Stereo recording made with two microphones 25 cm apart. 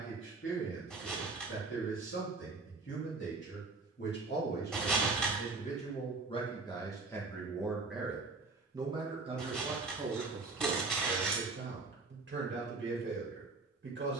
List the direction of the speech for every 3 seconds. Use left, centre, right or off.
left, left, centre, right, right.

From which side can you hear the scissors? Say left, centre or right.
centre.